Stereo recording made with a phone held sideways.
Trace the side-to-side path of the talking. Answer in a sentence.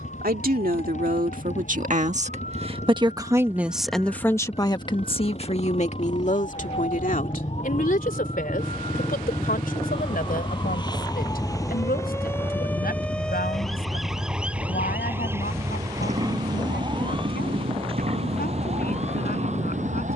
In this clip you hear the talking move from right to left.